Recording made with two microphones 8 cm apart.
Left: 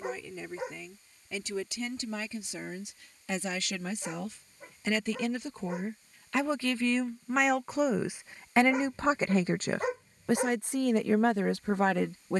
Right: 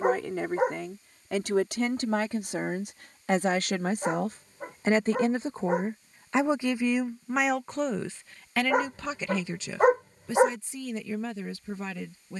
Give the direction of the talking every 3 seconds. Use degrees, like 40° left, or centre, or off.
60° right, 40° right, centre, 50° left.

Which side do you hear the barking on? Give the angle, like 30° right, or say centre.
50° right.